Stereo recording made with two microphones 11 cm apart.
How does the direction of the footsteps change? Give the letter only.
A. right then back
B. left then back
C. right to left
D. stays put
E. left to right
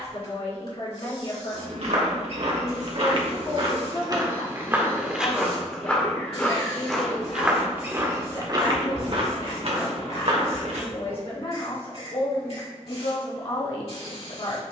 B.